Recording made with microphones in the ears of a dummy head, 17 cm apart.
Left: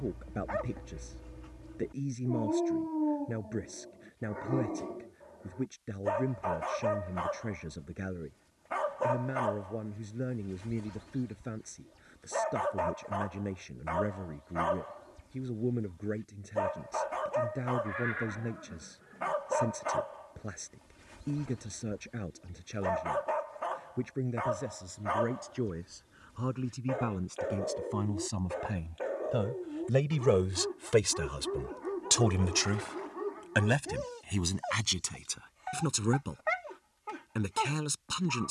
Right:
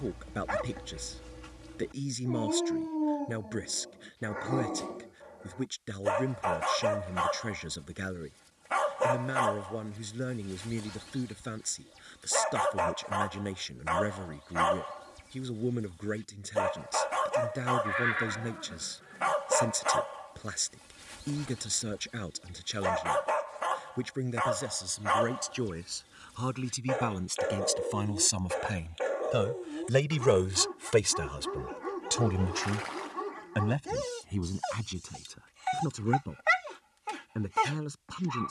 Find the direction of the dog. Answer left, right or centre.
right.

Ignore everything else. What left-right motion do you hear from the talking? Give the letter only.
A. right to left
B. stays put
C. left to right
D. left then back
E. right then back
A.